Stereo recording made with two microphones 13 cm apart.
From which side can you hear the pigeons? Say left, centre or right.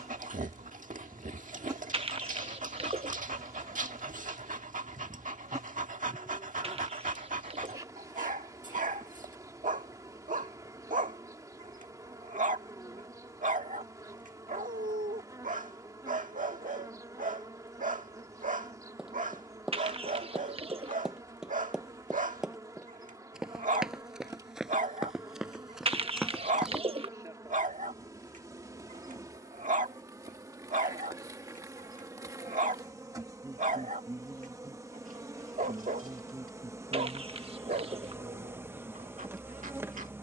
right.